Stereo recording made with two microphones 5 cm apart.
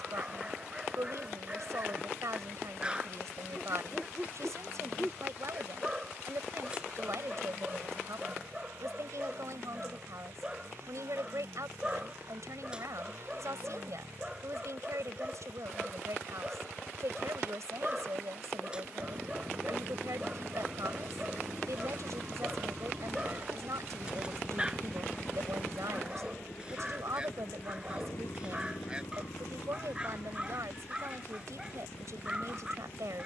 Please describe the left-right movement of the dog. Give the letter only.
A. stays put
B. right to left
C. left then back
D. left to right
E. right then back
A.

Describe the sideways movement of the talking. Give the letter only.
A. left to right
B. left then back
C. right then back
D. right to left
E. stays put
E.